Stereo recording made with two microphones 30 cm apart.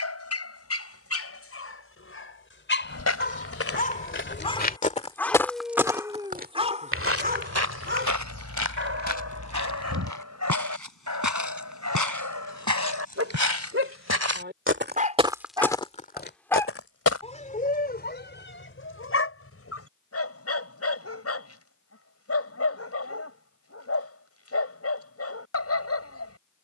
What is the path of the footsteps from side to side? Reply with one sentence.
In this clip you hear the footsteps move from left to right and back again.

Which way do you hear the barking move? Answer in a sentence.
You can hear the barking move from left to right and back again.